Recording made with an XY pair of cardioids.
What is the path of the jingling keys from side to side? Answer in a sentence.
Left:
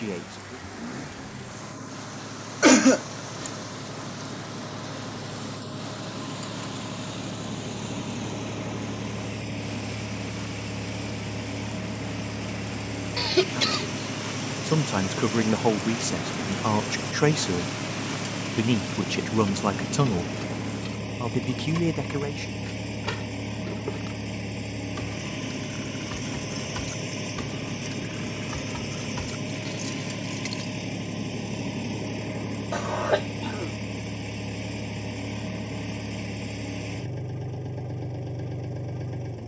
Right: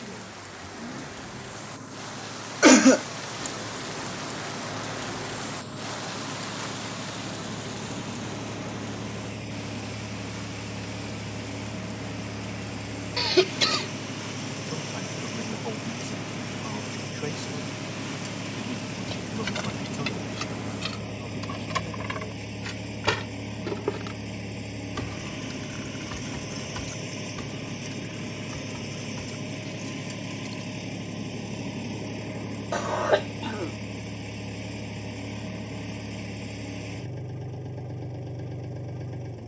You can hear the jingling keys go from the right side to the left.